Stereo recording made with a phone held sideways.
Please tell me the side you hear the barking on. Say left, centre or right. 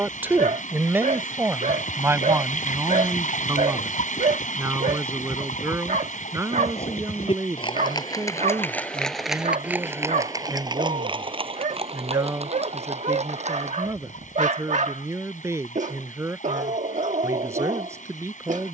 right.